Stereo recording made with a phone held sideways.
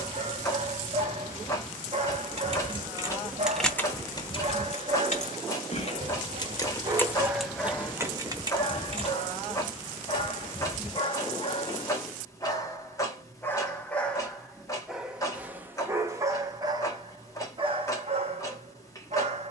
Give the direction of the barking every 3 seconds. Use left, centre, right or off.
right, right, centre, left, centre, right, right.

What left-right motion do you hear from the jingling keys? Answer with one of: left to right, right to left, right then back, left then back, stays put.
left then back.